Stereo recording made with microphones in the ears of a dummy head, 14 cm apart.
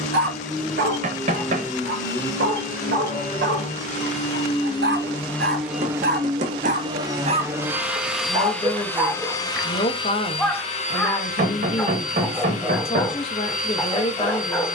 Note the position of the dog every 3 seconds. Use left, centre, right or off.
right, right, right, centre, centre.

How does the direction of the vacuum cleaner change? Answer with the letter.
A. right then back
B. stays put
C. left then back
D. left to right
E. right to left
A.